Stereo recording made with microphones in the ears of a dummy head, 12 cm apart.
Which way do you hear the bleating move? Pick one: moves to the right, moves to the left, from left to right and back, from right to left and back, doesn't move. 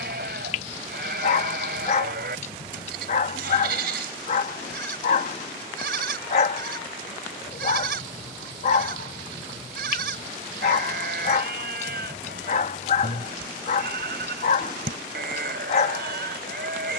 doesn't move.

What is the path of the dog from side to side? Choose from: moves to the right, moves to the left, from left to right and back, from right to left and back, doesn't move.
doesn't move.